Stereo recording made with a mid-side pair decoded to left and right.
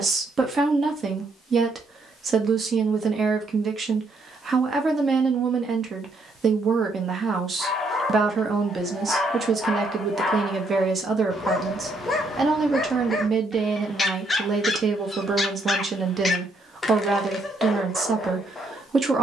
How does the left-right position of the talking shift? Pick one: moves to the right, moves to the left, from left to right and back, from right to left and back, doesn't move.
doesn't move.